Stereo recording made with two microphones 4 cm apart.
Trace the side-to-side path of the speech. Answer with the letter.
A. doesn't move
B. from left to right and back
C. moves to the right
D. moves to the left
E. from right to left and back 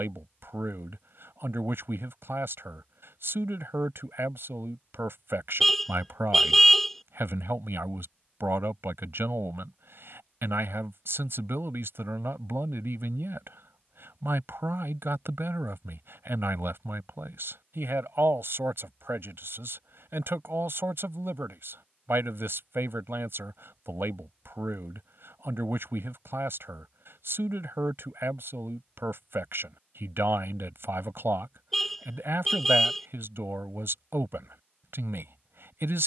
A.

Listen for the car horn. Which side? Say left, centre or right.
centre.